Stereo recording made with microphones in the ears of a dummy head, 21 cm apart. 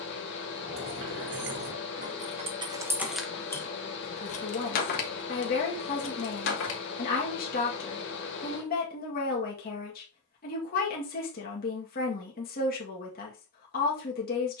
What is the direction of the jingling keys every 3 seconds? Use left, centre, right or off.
right, left, left, off, off.